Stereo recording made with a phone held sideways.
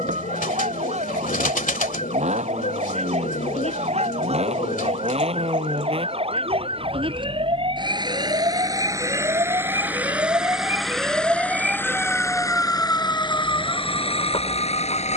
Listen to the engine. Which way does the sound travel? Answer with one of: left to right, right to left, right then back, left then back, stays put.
right to left.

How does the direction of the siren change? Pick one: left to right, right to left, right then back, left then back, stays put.
right to left.